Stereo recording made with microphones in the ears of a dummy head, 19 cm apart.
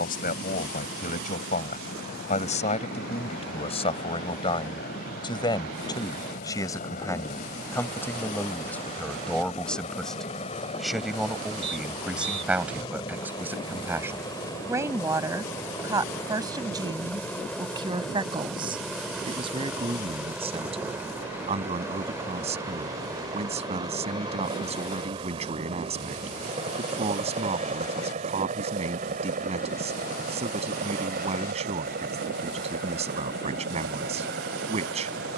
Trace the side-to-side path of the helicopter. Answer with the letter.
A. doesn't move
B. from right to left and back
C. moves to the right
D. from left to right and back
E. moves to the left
C.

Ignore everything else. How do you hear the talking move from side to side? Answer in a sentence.
In this clip you hear the talking move to the right.